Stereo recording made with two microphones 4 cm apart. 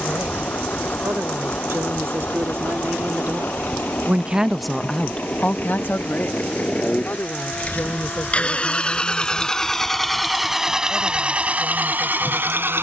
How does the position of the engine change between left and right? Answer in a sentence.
In this clip you hear the engine travel towards the right.